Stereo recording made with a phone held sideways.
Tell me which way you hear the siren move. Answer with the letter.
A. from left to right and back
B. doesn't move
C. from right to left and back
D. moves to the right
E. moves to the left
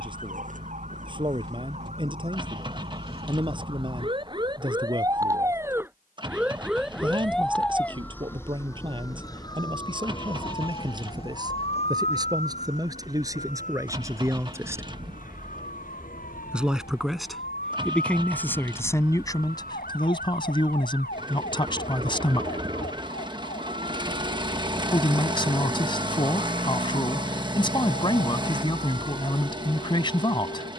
E.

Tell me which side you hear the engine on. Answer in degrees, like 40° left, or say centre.
30° right.